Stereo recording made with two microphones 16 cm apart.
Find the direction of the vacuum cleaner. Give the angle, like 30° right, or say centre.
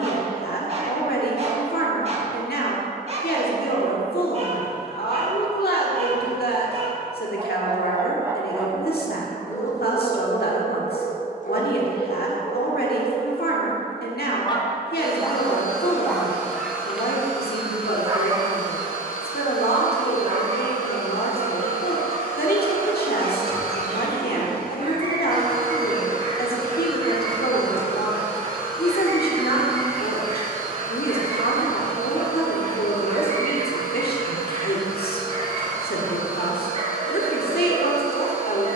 70° left.